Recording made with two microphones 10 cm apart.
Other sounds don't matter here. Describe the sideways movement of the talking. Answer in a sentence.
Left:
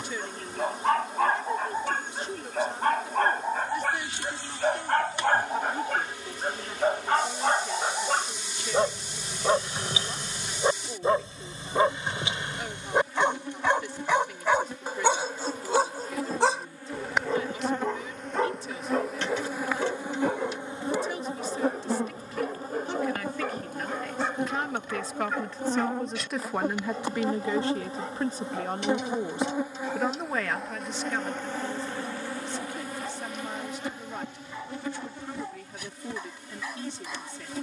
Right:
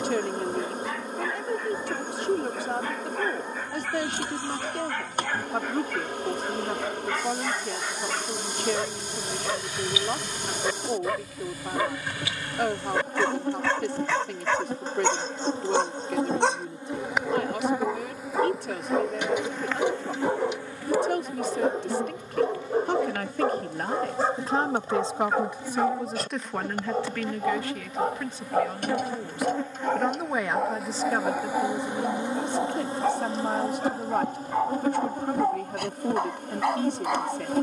You can hear the talking go left and come back.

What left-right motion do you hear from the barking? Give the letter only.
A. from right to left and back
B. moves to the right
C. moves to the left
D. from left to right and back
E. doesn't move
B.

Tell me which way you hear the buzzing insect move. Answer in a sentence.
You can hear the buzzing insect move from right to left and back again.